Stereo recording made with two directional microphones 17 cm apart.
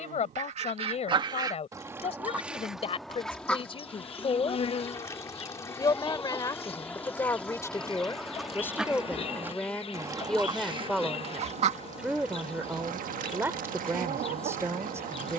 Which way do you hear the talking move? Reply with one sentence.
In this clip you hear the talking move from left to right.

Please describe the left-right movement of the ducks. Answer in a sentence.
In this clip you hear the ducks move from right to left and back again.